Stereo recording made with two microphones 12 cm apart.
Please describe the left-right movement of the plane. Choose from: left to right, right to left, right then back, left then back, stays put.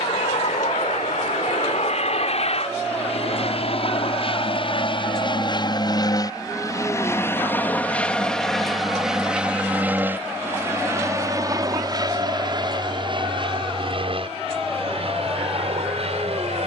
left to right.